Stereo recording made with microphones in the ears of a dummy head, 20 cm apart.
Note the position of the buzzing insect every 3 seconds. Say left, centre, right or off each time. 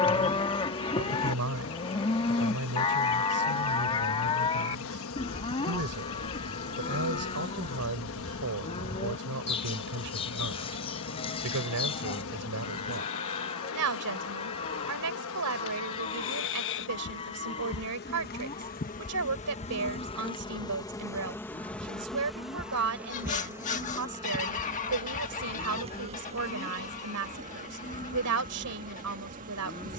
left, left, left, left, left, left, left, centre, right, right.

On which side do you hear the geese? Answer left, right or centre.
left.